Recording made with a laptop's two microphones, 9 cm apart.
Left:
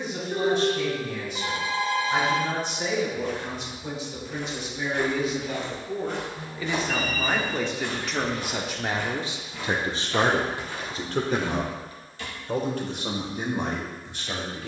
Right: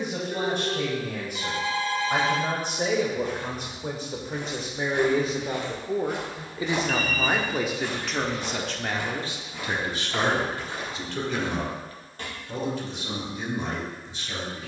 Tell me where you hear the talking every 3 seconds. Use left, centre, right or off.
right, right, centre, left, left.